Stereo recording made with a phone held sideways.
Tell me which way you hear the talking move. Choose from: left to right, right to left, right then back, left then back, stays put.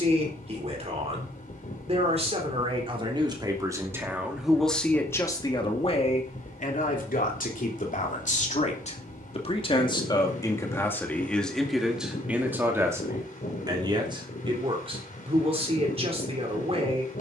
left then back.